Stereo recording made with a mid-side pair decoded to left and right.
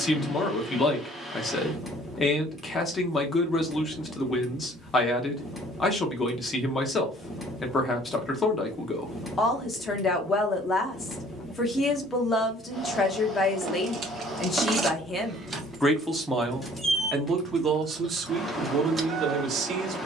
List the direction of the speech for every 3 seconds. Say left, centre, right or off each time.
left, left, left, left, left, centre, right.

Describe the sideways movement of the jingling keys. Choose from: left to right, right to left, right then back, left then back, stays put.
left then back.